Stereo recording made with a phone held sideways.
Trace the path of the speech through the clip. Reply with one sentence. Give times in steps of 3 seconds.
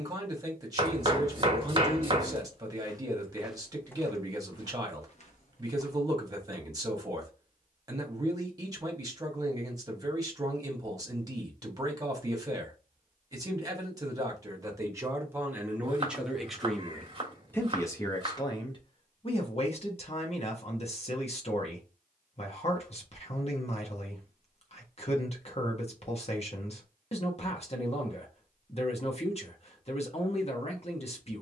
In this clip you hear the speech on the right from 0 s, in the centre from 15 s and on the left from 18 s.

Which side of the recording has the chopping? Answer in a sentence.
In this clip you hear the chopping on the right.